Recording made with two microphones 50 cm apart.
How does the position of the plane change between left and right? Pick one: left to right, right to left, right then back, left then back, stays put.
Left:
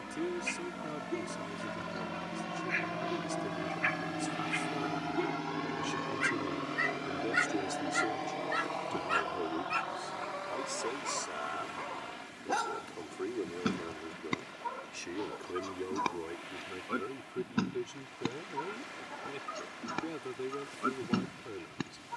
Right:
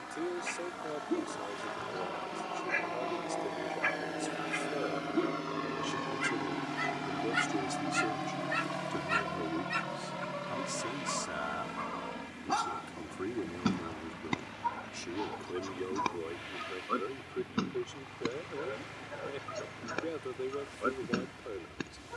left to right.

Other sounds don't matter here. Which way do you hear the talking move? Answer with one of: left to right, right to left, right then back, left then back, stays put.
right then back.